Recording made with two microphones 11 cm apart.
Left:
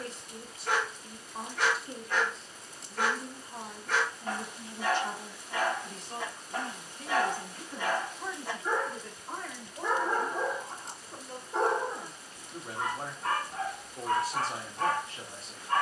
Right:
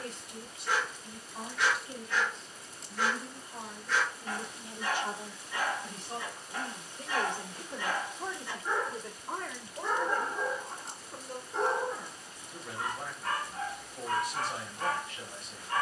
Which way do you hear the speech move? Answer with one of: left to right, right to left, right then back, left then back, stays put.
right then back.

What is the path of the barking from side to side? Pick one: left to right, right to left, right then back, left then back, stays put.
stays put.